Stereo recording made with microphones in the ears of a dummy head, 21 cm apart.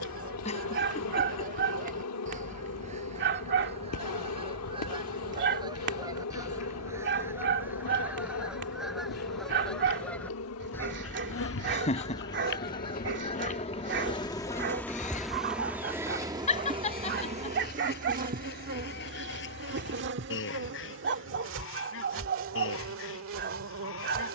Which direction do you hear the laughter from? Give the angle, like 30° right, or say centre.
30° left.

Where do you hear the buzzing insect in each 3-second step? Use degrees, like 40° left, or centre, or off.
60° left, 60° left, 60° left, 60° left, 30° left, 20° right, 40° right, 50° right.